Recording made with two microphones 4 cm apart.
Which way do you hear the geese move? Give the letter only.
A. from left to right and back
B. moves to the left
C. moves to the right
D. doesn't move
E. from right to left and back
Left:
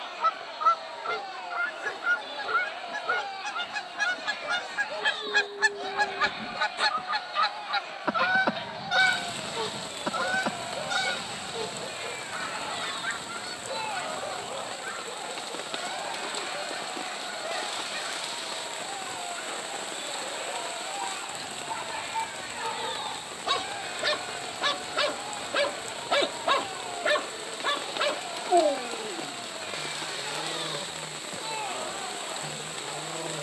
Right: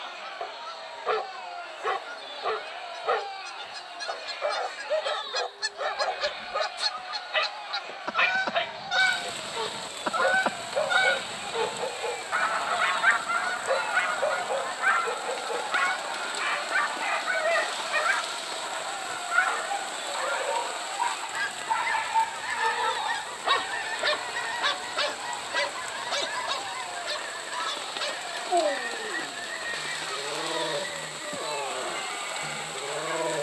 C.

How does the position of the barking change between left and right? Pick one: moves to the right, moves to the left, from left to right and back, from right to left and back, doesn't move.
from right to left and back.